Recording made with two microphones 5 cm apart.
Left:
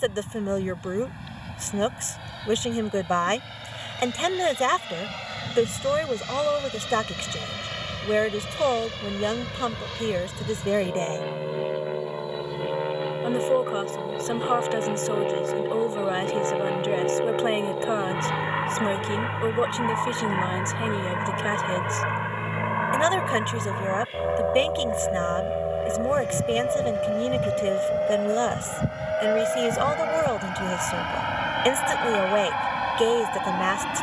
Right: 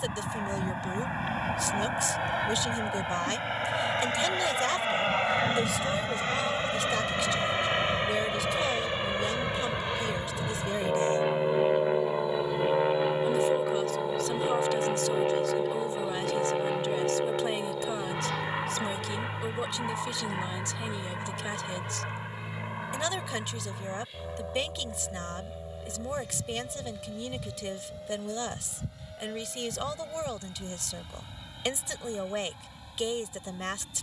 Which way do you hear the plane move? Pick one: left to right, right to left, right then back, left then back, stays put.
right to left.